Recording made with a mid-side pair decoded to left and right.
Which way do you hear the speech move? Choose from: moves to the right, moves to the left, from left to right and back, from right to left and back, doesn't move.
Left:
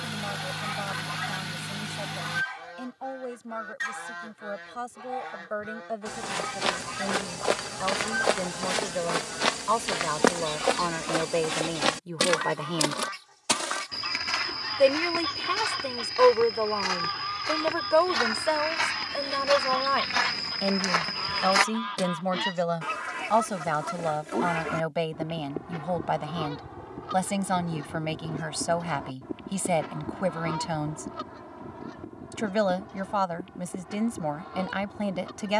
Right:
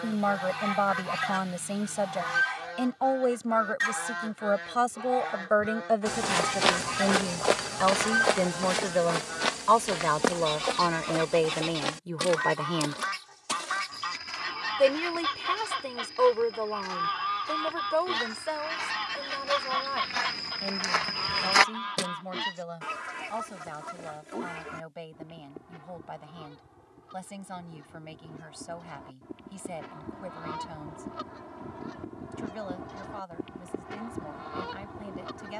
moves to the left.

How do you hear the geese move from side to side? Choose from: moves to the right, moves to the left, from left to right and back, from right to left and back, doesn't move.
from right to left and back.